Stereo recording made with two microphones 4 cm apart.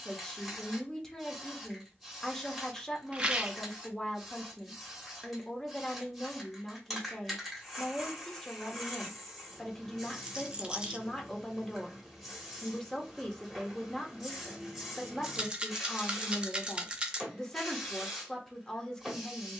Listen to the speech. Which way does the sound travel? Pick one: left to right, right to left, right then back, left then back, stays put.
stays put.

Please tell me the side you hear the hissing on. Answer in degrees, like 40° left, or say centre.
centre.